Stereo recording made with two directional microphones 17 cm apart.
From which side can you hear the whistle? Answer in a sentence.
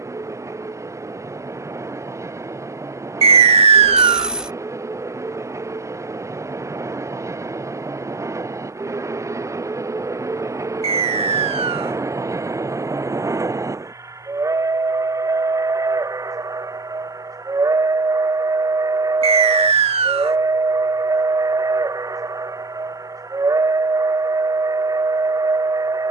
You can hear the whistle on the right.